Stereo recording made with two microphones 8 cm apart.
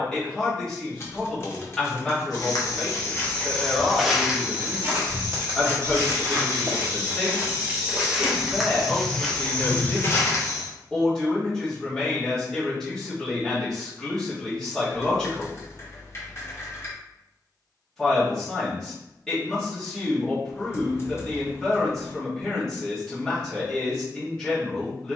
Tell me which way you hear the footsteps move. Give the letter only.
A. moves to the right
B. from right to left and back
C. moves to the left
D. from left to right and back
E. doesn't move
D.